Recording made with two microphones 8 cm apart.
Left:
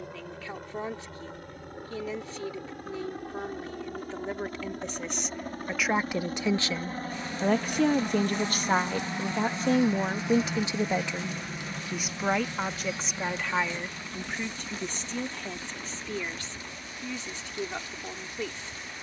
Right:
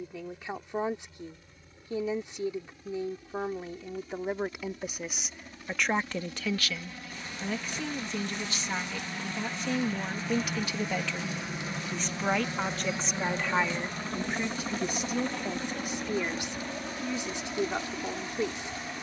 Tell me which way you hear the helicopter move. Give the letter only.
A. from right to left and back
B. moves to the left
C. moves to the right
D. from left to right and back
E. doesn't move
C.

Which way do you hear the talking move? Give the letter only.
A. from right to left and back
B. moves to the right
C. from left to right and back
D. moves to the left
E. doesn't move
A.